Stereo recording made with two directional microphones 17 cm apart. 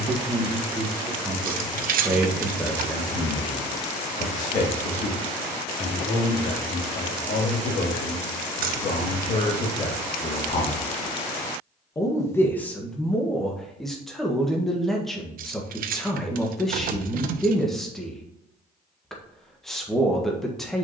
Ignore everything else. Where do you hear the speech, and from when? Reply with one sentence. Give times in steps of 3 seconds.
You can hear the speech in the centre from 0 s, on the left from 3 s and in the centre from 12 s.